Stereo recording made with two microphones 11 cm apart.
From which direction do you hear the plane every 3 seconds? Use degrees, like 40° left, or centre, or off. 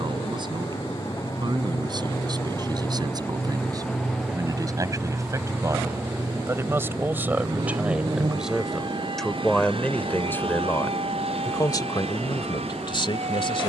40° left, centre, 40° right, 50° right, 60° right.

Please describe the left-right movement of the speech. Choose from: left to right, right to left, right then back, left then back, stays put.
right to left.